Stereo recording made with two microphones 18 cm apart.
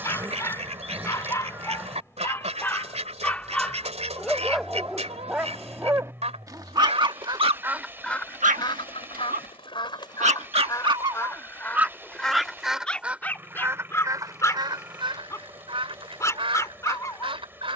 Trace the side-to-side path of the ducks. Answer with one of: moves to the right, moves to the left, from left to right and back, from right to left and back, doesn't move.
from right to left and back.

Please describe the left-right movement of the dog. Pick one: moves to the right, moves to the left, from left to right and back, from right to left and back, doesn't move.
from left to right and back.